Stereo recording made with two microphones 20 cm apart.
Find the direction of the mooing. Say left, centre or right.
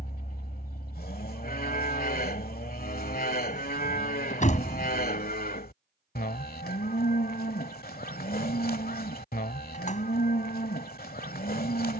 left.